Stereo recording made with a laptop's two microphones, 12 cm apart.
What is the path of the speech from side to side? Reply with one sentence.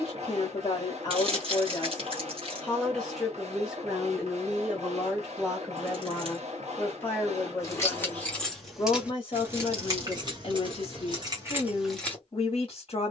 In this clip you hear the speech go right and come back.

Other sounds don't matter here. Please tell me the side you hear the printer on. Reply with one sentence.
In this clip you hear the printer on the right.